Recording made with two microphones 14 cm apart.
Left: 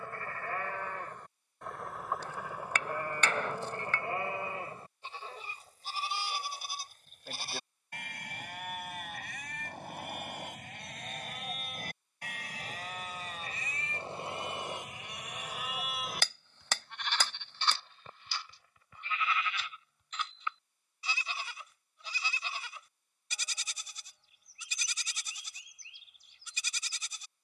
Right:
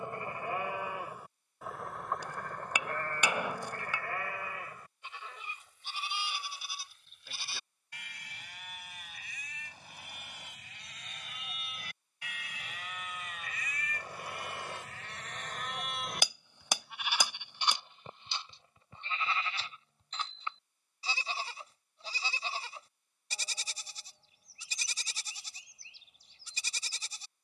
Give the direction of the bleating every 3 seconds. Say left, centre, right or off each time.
centre, left, left, left, left, centre, right, right, right.